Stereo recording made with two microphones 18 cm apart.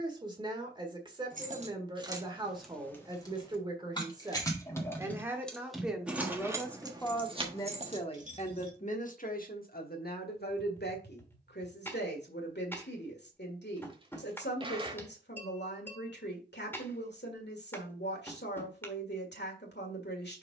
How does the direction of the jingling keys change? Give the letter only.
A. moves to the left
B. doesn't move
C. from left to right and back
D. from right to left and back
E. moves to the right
D.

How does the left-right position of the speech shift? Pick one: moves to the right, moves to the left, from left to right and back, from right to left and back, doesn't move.
moves to the left.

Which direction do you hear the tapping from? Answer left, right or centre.
centre.